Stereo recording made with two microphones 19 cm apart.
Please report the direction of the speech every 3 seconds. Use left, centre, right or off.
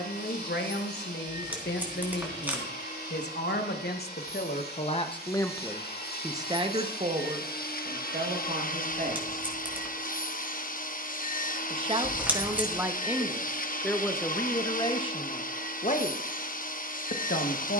left, left, right, right, centre, left.